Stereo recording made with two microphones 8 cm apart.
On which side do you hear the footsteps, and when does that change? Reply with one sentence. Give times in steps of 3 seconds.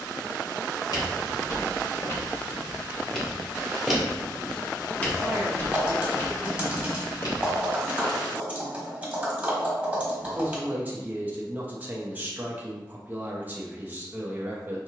You can hear the footsteps on the left from 0 s, in the centre from 3 s, on the left from 6 s and not at all from 9 s.